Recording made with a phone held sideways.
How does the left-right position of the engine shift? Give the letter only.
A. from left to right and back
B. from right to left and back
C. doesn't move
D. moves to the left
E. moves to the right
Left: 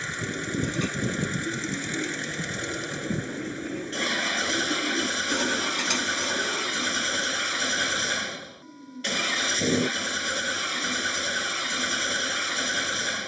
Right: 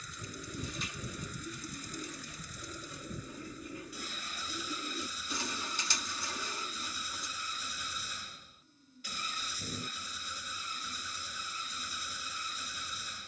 C.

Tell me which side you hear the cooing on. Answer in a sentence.
You can hear the cooing on the left.